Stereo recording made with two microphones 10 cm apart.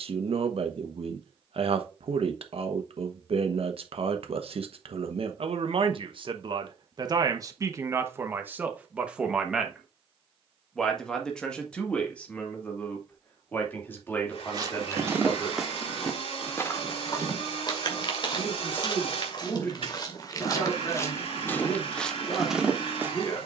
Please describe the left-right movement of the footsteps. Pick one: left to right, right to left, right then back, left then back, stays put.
left then back.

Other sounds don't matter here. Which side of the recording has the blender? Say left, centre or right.
left.